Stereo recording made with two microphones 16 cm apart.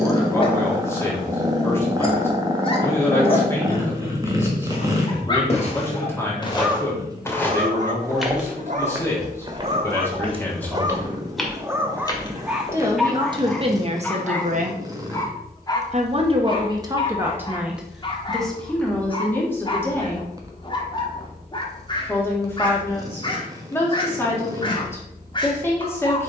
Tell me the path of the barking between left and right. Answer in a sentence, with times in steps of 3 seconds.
You can hear the barking on the left from 0 s, on the right from 6 s, in the centre from 12 s and on the left from 15 s.